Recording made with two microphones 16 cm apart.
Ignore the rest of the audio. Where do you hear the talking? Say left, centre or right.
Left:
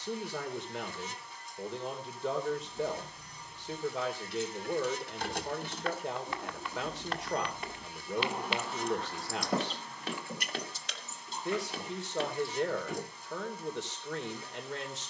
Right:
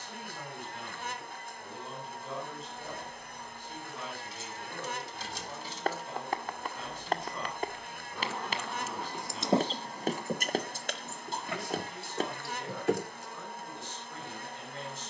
left.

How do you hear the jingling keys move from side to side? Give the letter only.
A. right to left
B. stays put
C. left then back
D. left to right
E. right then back
D.